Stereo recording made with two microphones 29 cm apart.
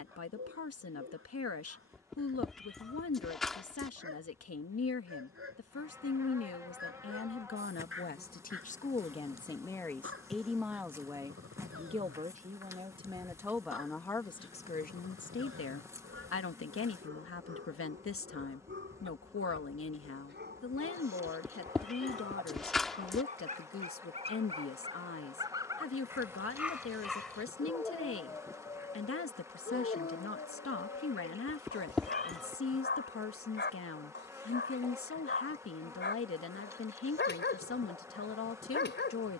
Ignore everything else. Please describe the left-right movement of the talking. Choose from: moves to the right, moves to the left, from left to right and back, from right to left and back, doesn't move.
from left to right and back.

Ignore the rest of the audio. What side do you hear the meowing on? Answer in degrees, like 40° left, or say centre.
centre.